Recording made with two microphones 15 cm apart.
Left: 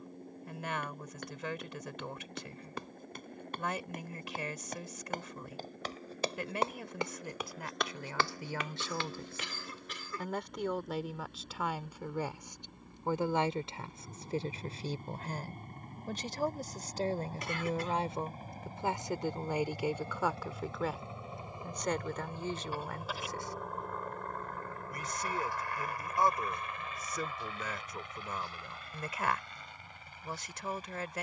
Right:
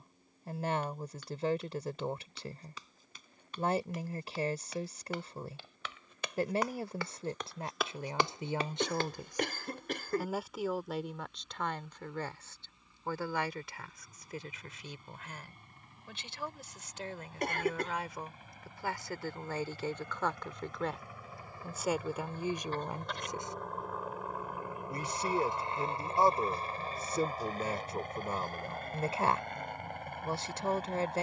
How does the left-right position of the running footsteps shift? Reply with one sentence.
In this clip you hear the running footsteps move to the right.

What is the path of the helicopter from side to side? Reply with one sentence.
You can hear the helicopter go from the left side to the right.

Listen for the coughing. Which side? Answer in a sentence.
In this clip you hear the coughing on the right.